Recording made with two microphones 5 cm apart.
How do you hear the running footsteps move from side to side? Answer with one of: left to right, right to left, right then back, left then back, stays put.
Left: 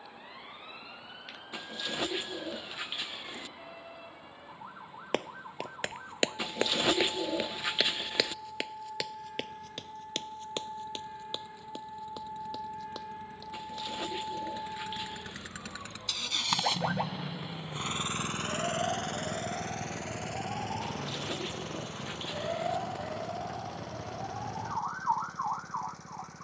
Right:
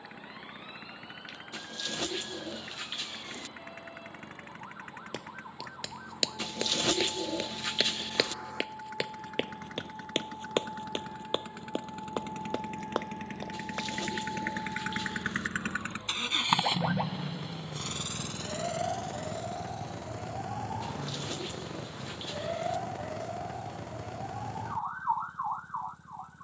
left to right.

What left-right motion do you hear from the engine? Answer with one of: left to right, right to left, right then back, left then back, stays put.
right to left.